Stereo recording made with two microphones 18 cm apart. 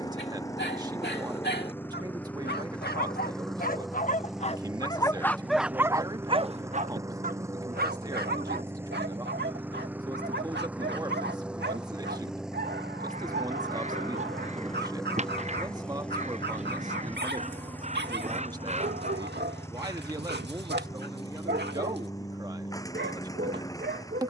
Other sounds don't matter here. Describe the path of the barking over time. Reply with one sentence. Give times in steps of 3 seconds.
You can hear the barking on the left from 0 s and on the right from 6 s.